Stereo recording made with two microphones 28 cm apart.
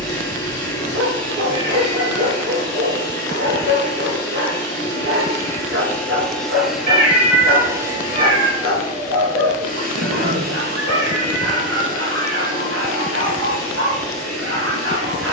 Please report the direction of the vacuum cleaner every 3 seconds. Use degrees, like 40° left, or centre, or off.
10° left, 10° left, 10° right, 30° right, 50° right.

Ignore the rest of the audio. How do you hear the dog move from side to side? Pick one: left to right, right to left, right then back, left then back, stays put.
stays put.